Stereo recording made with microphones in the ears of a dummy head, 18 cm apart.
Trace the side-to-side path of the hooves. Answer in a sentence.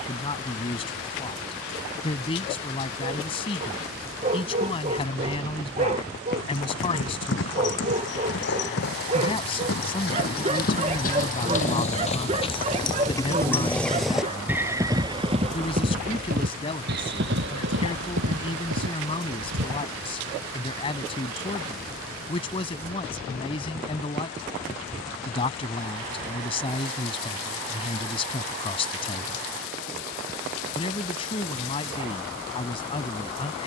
You can hear the hooves go from the left side to the right.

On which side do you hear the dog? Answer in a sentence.
You can hear the dog on the right.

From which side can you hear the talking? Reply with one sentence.
In this clip you hear the talking on the left.